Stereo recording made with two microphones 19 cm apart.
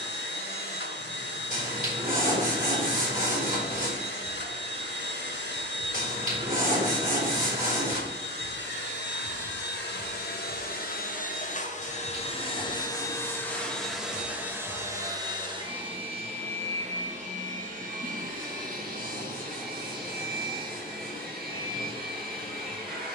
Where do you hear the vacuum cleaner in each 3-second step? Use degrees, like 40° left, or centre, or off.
70° left, 70° left, 70° left, 60° left, 10° left, 30° right, 50° right, 50° right.